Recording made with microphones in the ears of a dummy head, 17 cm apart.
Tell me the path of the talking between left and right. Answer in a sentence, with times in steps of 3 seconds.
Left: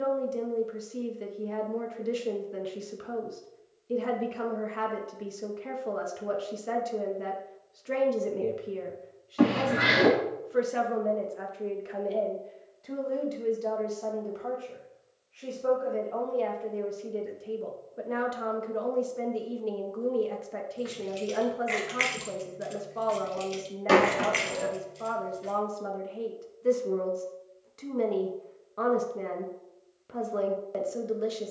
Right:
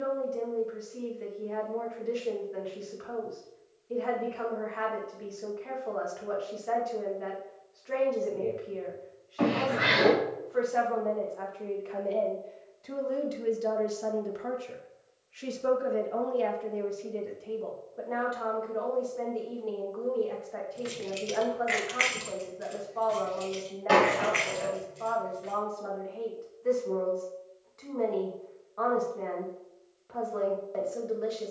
You can hear the talking on the left from 0 s, in the centre from 12 s and on the left from 18 s.